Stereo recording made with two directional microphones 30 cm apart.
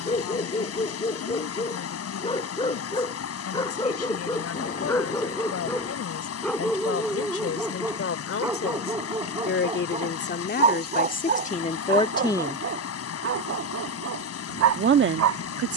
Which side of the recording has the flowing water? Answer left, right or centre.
left.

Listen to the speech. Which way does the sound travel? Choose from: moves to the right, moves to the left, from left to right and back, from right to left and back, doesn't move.
moves to the right.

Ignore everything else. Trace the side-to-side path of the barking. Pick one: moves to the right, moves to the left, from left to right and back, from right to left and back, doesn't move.
moves to the right.